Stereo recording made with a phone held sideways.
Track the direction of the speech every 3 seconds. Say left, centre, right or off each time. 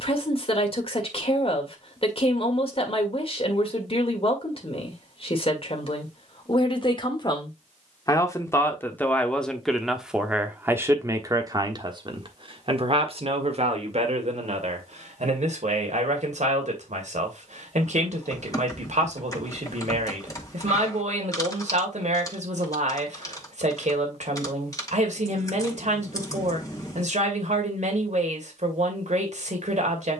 left, left, left, centre, right, right, right, right, right, right.